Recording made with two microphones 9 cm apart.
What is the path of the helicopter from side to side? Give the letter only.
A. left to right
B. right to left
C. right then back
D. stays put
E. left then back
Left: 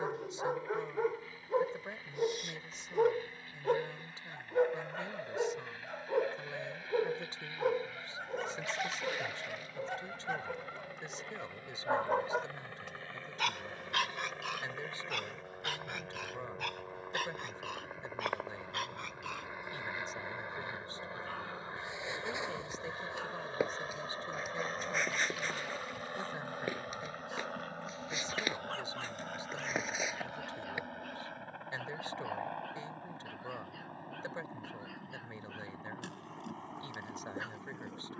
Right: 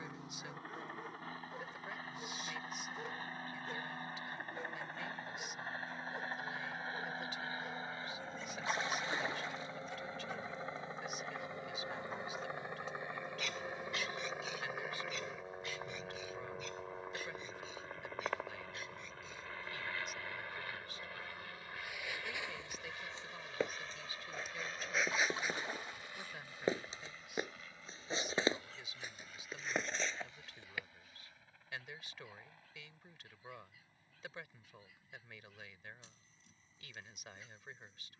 B.